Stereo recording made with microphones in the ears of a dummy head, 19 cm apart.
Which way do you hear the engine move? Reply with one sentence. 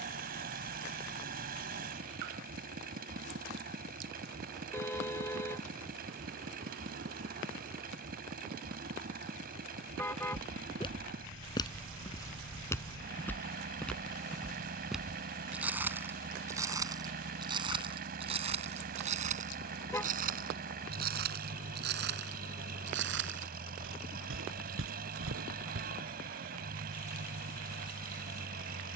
In this clip you hear the engine stay put.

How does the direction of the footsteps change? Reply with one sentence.
In this clip you hear the footsteps move to the right.